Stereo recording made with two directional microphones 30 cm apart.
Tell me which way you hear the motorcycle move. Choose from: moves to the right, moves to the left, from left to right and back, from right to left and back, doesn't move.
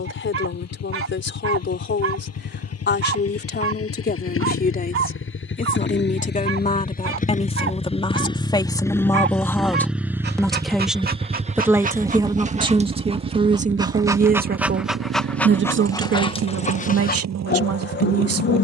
moves to the right.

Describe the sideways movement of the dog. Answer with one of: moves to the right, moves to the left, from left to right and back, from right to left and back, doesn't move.
moves to the left.